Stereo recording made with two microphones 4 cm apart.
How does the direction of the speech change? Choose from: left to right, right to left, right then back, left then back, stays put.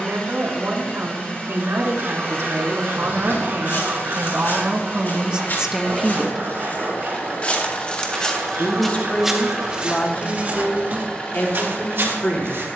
right to left.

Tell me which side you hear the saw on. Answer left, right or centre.
right.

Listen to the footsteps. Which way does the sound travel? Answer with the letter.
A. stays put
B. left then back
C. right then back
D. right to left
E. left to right
E.